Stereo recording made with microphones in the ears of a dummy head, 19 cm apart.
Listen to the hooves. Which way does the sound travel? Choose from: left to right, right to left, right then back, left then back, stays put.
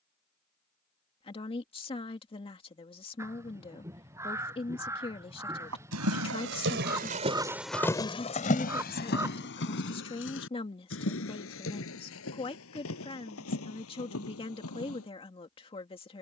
right to left.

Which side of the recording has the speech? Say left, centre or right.
left.